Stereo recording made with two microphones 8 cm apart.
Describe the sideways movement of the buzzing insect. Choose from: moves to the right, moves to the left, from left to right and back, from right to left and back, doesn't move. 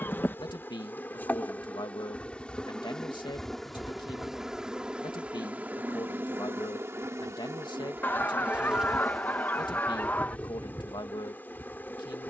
from left to right and back.